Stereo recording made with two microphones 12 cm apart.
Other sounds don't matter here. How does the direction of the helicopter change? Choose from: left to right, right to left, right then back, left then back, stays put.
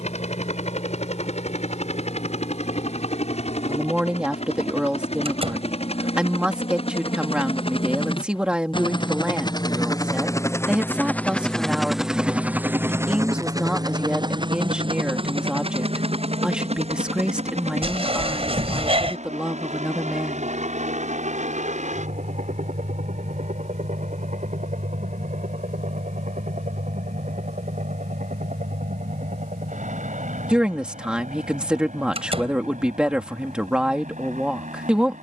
left to right.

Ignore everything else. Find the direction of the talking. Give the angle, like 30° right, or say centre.
10° right.